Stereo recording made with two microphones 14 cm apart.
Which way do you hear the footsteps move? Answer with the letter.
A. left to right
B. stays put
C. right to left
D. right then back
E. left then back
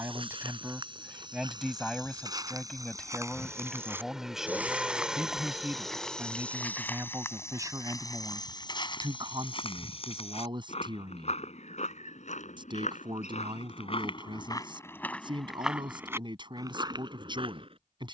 E.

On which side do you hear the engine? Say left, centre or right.
centre.